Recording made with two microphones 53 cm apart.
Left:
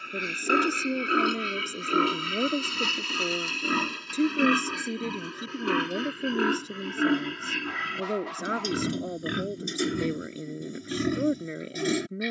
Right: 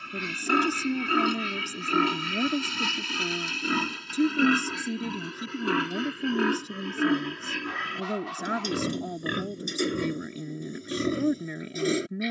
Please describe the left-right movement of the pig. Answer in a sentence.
You can hear the pig go from the right side to the left.